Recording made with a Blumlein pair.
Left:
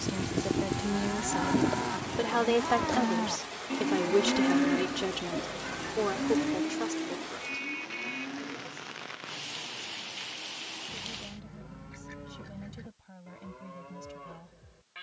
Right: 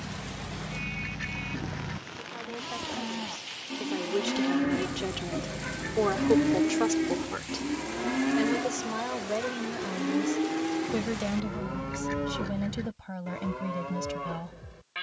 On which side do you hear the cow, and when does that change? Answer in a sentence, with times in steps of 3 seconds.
You can hear the cow on the left from 0 s, in the centre from 3 s and on the right from 6 s.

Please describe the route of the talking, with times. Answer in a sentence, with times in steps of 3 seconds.
In this clip you hear the talking on the left from 0 s, in the centre from 3 s and on the right from 6 s.